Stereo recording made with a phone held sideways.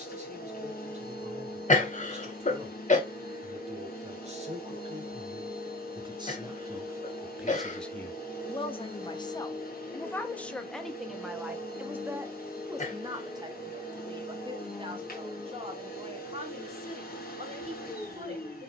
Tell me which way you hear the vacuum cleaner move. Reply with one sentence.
You can hear the vacuum cleaner stay in one place.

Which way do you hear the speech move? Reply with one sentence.
In this clip you hear the speech move from right to left and back again.